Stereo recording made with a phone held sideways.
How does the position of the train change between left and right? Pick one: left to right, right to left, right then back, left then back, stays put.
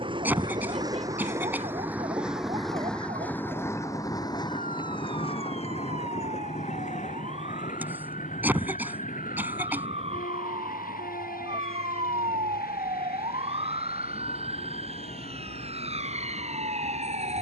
right to left.